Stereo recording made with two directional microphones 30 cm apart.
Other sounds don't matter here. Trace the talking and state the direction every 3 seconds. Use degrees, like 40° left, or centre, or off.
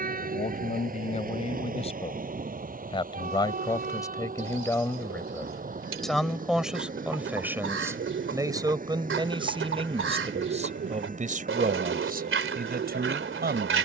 20° left, 10° left, 10° right, 20° right, 30° right.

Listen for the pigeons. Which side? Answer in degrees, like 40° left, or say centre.
50° right.